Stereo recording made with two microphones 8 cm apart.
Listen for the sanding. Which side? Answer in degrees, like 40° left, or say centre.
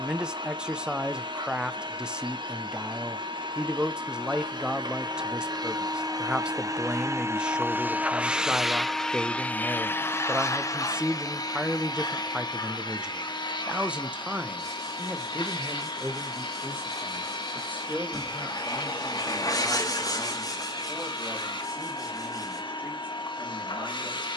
50° left.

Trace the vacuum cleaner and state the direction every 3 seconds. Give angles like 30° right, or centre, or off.
70° right, 60° right, 30° right, 30° left, 60° left, 70° left, 70° left, 70° left.